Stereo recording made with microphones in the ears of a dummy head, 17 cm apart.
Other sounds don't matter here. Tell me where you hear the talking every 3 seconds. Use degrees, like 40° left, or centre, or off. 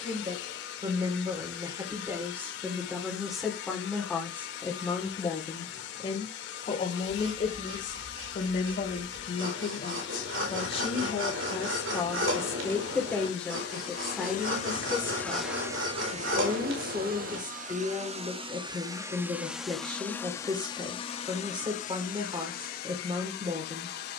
20° right, 10° left, 40° left, 30° left, centre, 20° right, 20° right, 20° right.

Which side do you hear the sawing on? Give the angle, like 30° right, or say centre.
80° right.